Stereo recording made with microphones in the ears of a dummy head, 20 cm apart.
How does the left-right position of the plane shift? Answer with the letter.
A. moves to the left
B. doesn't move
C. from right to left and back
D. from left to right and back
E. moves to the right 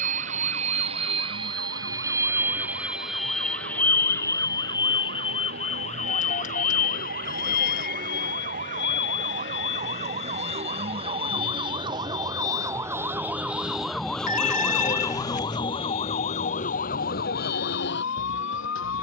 A.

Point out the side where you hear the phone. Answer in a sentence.
You can hear the phone on the left.